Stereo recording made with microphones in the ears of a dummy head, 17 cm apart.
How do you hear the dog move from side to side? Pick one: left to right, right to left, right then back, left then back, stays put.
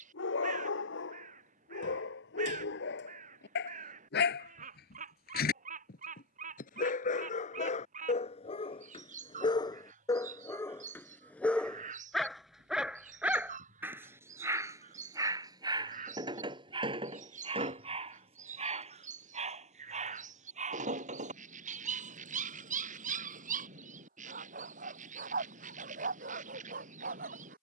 left to right.